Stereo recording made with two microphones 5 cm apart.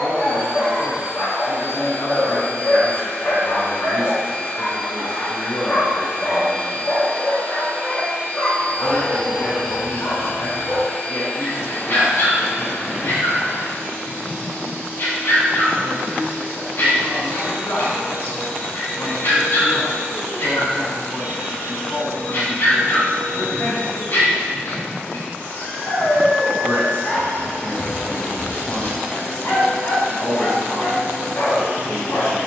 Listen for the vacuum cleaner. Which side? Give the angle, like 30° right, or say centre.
40° left.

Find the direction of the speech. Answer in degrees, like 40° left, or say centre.
70° left.